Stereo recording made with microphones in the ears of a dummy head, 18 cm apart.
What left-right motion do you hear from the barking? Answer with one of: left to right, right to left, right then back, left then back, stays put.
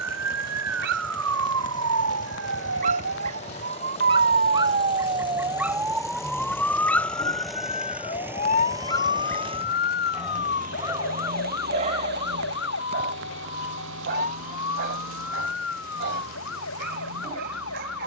left then back.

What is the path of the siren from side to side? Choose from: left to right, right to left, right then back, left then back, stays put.
right to left.